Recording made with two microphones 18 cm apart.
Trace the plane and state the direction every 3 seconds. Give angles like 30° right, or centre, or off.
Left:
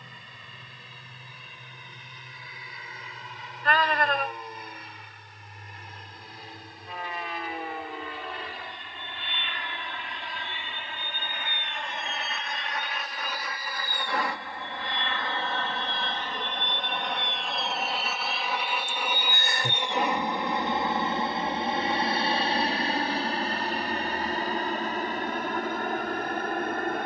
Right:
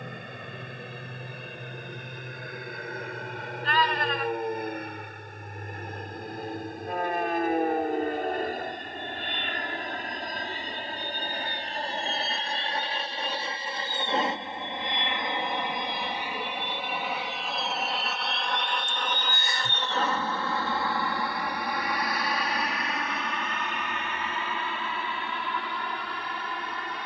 70° right, 60° right, 50° right, 40° right, 30° right, 10° right, 10° left, 30° left, 40° left.